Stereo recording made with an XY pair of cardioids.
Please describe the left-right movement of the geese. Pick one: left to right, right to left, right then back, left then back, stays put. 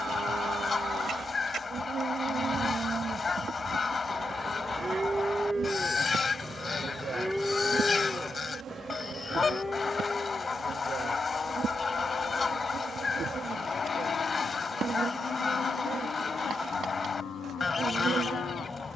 stays put.